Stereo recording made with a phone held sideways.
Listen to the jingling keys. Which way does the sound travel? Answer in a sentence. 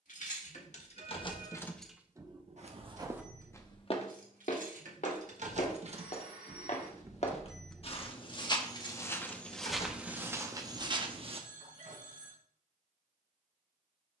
In this clip you hear the jingling keys move from left to right and back again.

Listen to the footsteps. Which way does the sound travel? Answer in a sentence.
You can hear the footsteps move from right to left and back again.